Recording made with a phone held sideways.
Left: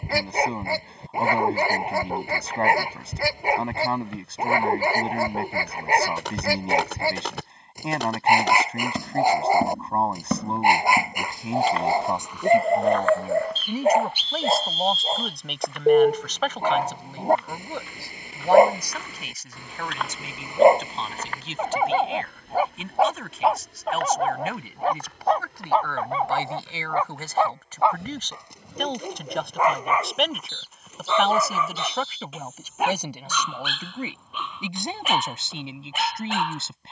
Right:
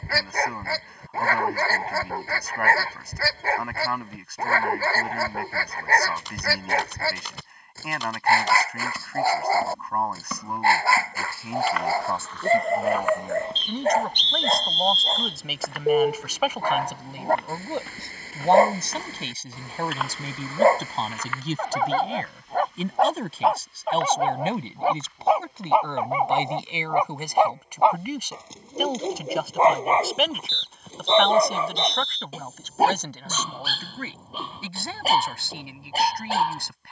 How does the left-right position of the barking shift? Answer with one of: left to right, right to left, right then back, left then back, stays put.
left to right.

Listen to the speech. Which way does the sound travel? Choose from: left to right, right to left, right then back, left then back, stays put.
right then back.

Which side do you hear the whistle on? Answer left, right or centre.
centre.